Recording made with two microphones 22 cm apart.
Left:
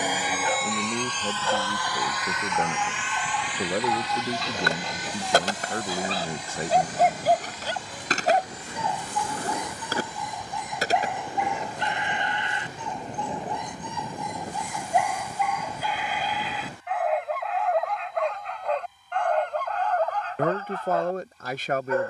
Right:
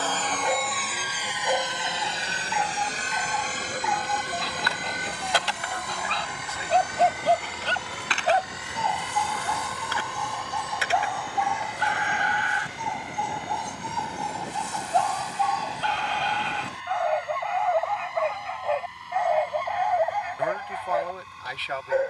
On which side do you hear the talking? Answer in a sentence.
You can hear the talking on the left.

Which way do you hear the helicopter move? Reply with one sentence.
In this clip you hear the helicopter move from left to right.